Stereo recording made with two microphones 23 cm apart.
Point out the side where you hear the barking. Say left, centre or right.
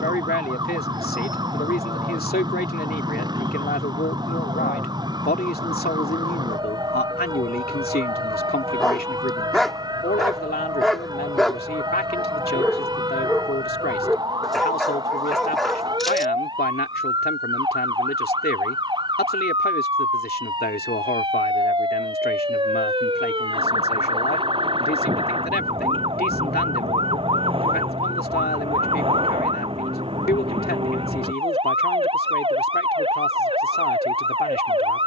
centre.